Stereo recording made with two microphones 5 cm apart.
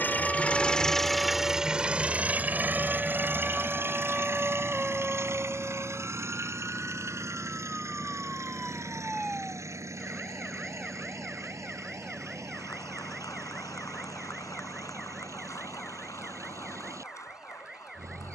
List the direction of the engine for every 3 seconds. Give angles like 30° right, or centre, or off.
10° right, 50° right, 60° right, 70° right, 70° right, 70° right.